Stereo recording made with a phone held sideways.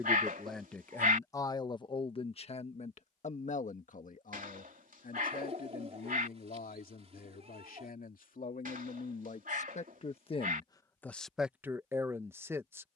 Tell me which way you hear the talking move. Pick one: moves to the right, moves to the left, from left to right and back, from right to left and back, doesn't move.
from right to left and back.